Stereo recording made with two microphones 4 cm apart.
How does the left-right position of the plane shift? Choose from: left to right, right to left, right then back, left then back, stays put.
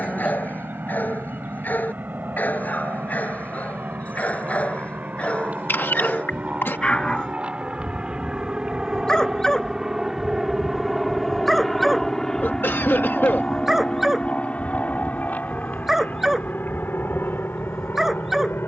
right to left.